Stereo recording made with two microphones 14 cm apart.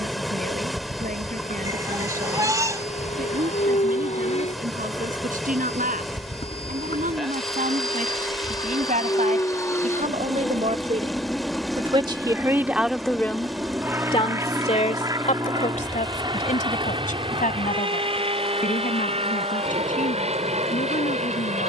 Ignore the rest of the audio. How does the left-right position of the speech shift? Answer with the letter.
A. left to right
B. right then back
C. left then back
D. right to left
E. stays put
D.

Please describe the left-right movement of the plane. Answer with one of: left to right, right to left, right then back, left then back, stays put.
left to right.